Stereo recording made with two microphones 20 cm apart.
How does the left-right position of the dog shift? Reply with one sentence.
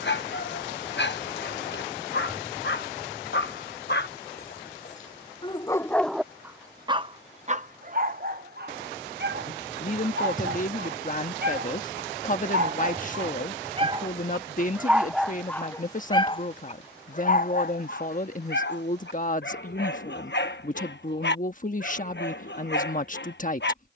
In this clip you hear the dog go right and come back.